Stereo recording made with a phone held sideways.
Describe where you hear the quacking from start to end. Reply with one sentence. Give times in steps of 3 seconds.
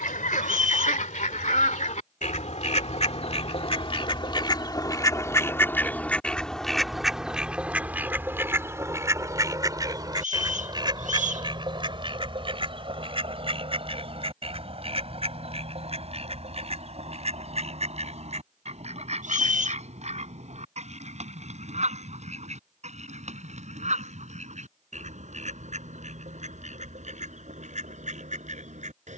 You can hear the quacking on the left from 0 s, in the centre from 6 s and on the right from 9 s.